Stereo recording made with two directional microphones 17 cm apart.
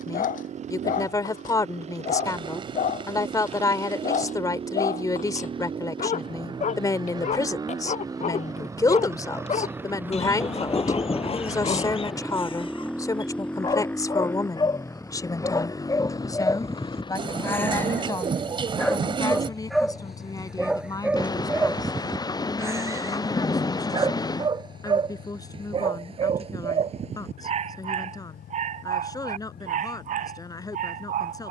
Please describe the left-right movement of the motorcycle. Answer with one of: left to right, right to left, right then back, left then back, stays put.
right to left.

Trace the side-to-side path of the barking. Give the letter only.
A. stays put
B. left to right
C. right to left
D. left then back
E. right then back
B.